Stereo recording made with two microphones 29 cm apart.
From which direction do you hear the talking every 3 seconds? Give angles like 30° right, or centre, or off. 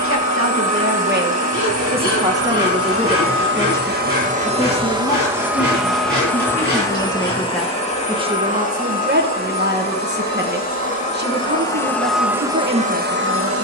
30° right, 20° left, centre, 40° right, 40° right.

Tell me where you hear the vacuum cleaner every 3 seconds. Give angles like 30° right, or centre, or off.
60° right, 20° right, 20° left, 30° left, 30° right.